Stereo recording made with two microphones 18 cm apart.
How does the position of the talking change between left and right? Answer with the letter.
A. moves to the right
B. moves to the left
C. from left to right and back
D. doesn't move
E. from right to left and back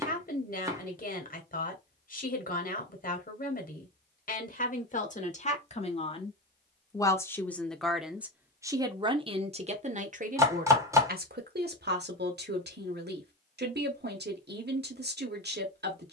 A.